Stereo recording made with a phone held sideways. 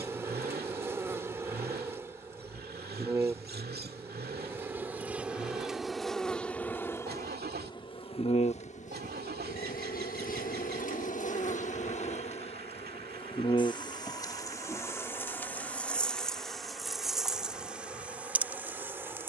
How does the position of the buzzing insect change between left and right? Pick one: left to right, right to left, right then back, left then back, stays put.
left then back.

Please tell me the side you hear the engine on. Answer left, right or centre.
right.